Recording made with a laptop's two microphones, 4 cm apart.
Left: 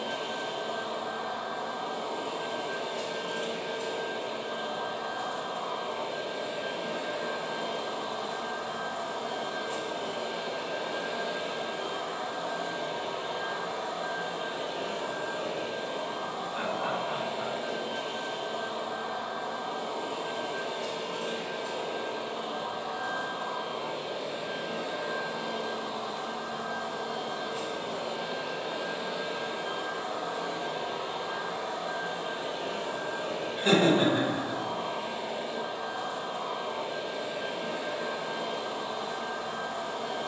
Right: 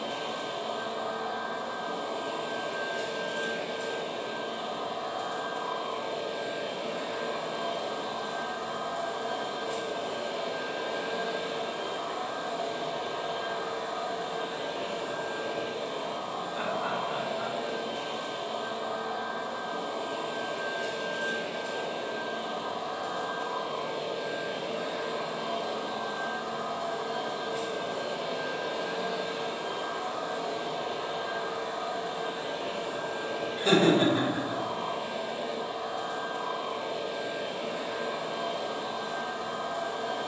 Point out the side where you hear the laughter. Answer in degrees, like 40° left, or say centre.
40° left.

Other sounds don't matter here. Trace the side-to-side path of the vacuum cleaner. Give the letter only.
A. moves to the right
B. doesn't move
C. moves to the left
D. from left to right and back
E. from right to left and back
D.